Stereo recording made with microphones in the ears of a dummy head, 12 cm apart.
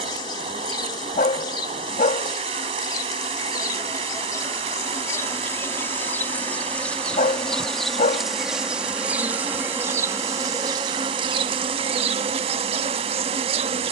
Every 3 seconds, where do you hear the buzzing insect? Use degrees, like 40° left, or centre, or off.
30° left, 20° left, centre, 20° right, 40° right.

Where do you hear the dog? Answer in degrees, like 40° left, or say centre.
50° left.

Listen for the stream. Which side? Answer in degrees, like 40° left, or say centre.
40° right.